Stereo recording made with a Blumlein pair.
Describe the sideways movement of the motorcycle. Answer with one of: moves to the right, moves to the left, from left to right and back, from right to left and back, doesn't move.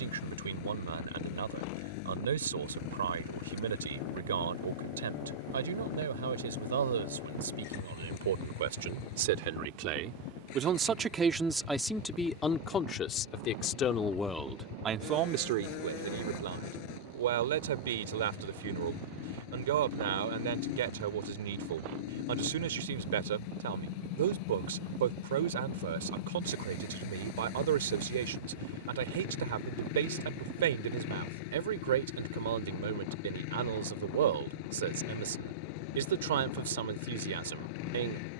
doesn't move.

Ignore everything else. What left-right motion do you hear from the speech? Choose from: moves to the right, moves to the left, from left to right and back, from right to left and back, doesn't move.
from right to left and back.